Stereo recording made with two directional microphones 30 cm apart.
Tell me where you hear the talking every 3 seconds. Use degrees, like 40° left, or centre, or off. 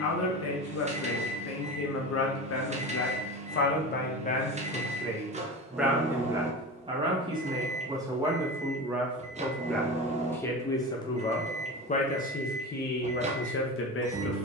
50° left, 20° left, 10° right, 10° left, 40° left.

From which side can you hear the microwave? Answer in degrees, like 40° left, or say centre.
20° right.